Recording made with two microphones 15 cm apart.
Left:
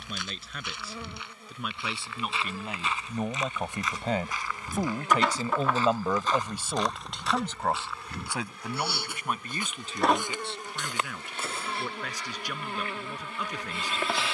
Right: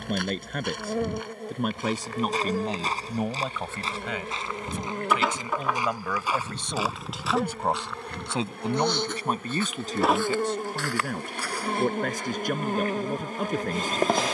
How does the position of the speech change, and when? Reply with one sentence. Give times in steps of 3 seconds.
In this clip you hear the speech on the right from 0 s, on the left from 3 s, in the centre from 6 s and on the right from 9 s.